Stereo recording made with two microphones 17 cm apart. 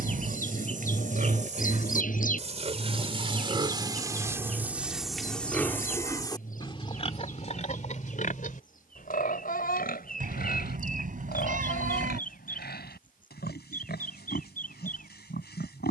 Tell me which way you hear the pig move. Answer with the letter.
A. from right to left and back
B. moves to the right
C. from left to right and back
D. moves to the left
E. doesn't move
D.